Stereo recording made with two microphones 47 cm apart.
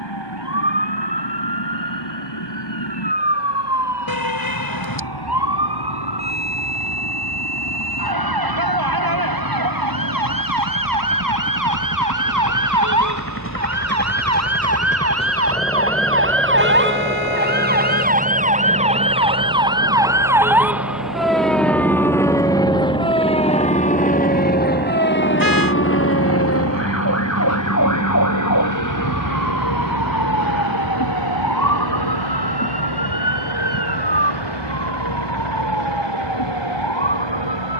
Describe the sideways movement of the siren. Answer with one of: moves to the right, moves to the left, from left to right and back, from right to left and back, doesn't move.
moves to the left.